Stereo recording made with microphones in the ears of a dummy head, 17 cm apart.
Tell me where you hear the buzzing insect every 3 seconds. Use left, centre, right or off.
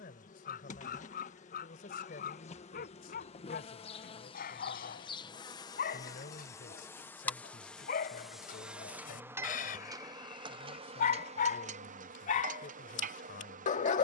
left, left, centre, right, right.